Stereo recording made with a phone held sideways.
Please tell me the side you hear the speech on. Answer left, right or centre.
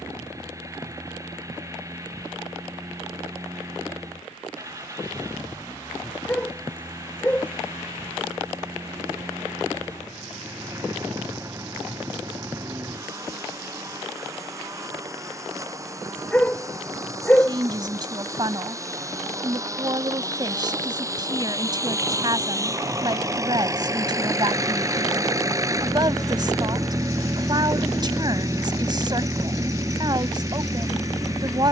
right.